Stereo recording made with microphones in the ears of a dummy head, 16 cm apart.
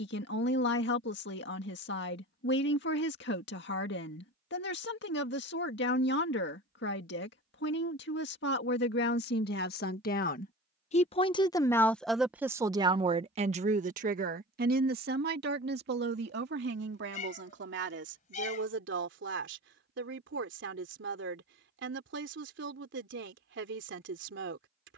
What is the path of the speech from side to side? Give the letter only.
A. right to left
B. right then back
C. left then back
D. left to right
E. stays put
D.